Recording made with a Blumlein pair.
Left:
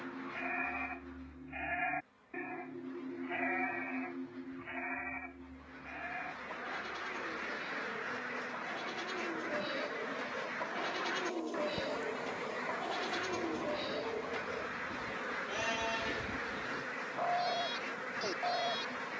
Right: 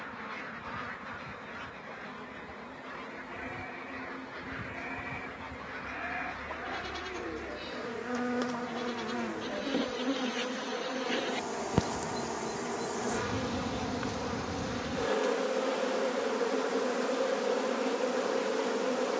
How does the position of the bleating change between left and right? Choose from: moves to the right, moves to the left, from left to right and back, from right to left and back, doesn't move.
from left to right and back.